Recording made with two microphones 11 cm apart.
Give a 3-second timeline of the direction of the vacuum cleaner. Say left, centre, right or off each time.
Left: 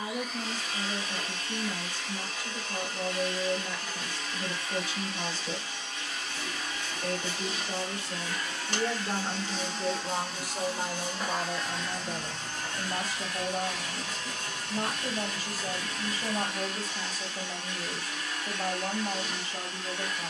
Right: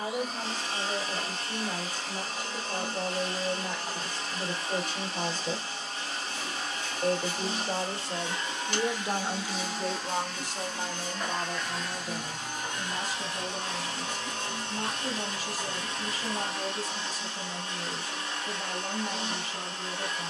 right, right, right, centre, right, right, right.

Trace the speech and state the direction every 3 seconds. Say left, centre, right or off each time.
right, right, right, centre, left, left, left.